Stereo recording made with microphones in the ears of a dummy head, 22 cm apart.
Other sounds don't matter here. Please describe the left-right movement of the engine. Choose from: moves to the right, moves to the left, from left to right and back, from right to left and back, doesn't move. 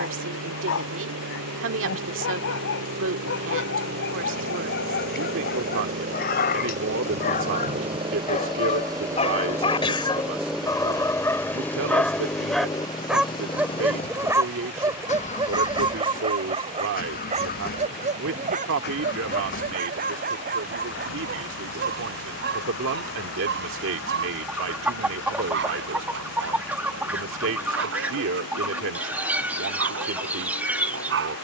moves to the left.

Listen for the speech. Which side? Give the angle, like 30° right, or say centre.
60° right.